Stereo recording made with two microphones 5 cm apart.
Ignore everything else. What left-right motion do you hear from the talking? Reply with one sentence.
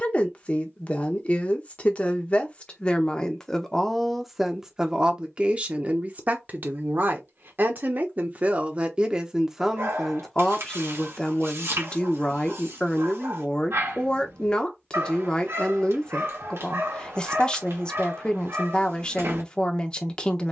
You can hear the talking go right and come back.